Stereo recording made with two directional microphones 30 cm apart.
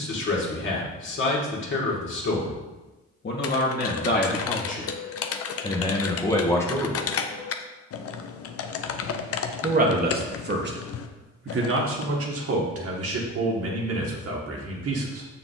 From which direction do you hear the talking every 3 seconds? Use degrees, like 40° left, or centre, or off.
40° left, 30° left, 10° left, 40° right, 50° right.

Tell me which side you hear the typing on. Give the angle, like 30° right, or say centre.
50° left.